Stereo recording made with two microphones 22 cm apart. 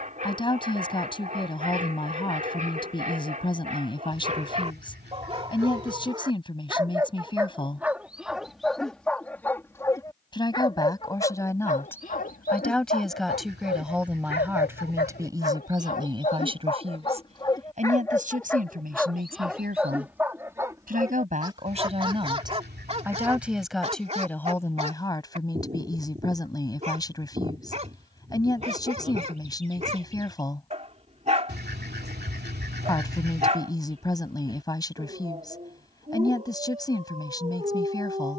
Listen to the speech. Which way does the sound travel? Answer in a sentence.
You can hear the speech go right and come back.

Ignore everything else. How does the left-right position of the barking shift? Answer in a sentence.
You can hear the barking move from right to left and back again.